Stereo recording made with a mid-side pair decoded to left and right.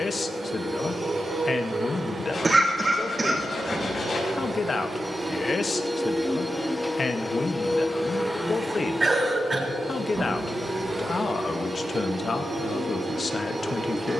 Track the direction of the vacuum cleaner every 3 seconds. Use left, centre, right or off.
right, right, centre, right, right.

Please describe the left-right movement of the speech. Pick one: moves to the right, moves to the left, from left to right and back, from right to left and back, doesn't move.
doesn't move.